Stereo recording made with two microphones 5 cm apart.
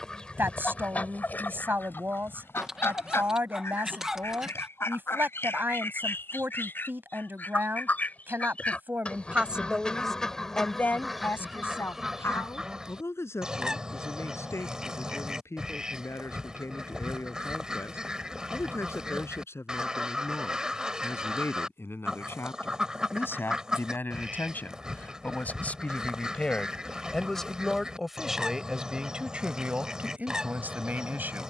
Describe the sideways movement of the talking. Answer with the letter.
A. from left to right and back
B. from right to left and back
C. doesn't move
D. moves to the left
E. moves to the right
B.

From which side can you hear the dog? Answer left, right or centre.
centre.